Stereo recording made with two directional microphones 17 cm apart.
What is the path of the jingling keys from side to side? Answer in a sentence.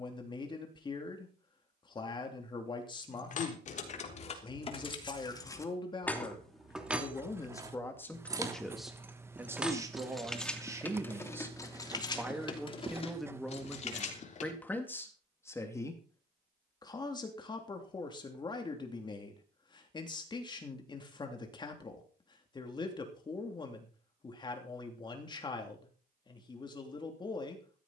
You can hear the jingling keys move from left to right and back again.